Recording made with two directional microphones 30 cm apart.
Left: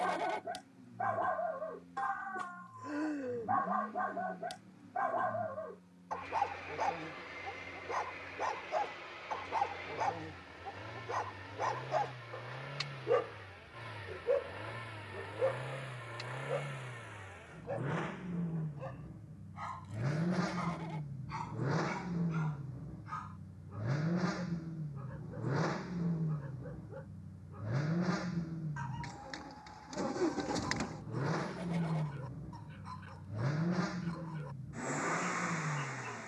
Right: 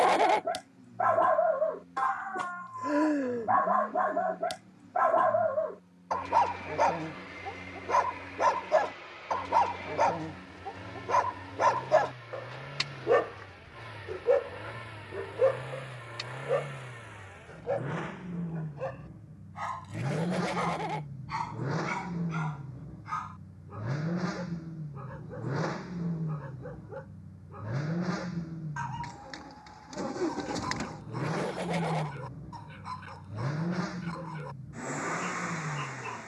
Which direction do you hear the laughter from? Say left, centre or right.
right.